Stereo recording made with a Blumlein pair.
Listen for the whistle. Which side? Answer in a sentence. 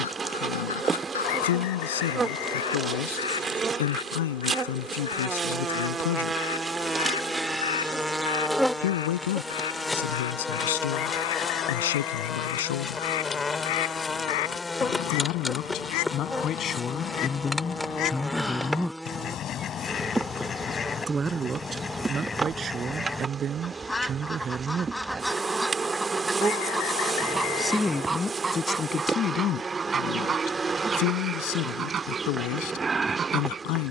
You can hear the whistle on the left.